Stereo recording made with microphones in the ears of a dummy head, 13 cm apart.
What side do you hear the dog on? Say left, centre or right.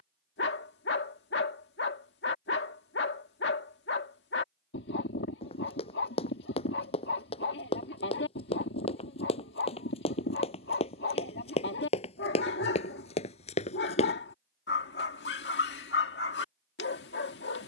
left.